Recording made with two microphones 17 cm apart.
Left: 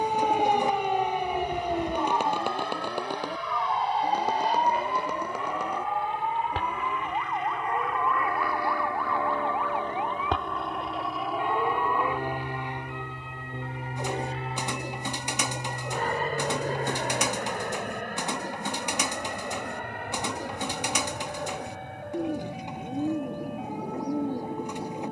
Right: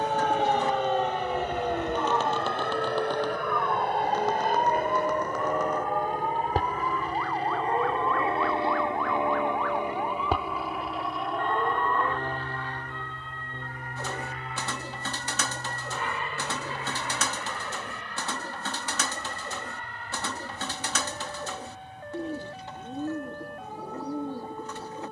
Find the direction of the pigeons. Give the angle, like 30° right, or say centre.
20° left.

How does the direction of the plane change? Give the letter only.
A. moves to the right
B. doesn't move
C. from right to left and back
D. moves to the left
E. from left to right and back
D.